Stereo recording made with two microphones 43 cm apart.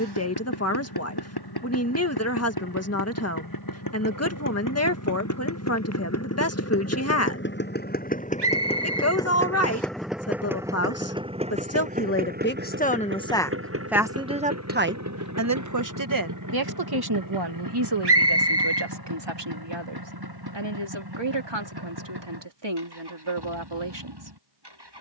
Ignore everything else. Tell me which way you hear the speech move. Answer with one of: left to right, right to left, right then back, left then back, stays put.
left to right.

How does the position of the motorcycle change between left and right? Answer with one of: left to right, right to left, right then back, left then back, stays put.
left to right.